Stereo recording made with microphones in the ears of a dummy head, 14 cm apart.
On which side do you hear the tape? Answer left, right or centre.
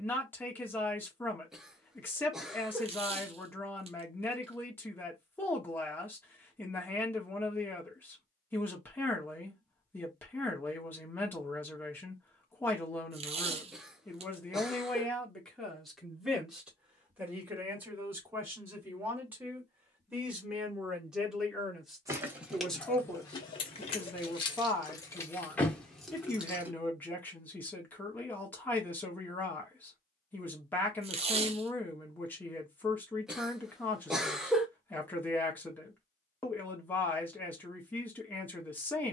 right.